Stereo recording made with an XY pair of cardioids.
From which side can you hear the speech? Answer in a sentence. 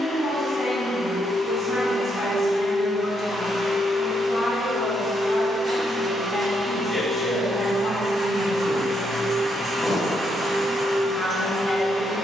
In this clip you hear the speech on the left.